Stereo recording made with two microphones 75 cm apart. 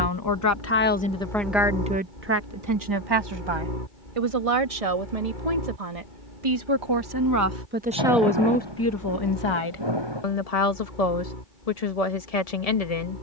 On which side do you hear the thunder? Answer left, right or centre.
right.